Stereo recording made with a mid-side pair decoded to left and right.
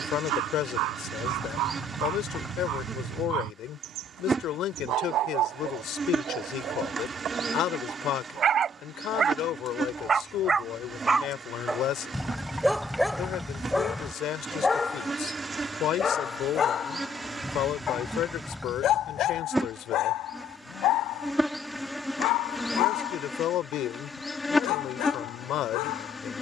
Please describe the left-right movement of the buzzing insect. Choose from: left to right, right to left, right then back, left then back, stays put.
right to left.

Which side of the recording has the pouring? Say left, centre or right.
centre.